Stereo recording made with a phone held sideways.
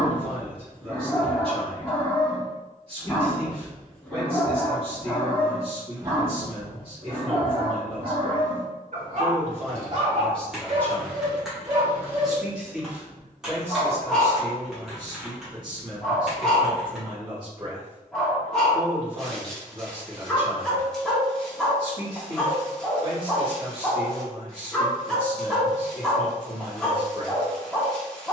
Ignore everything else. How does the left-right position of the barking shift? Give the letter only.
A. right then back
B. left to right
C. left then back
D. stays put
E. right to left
A.